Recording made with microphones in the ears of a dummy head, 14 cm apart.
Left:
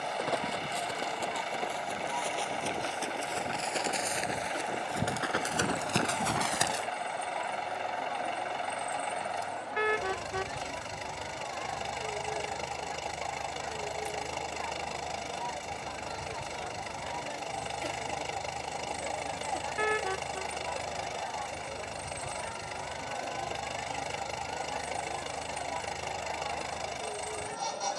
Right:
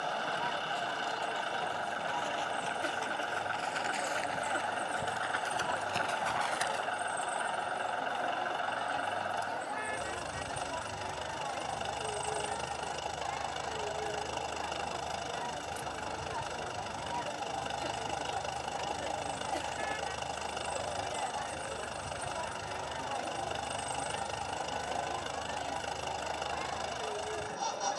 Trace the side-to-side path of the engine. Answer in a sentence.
You can hear the engine stay put.